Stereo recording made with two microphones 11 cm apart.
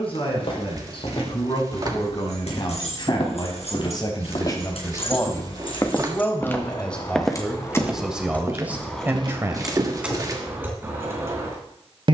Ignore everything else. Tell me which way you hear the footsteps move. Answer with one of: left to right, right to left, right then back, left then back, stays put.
left to right.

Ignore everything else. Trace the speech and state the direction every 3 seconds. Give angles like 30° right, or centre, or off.
50° left, 30° left, centre, 20° right.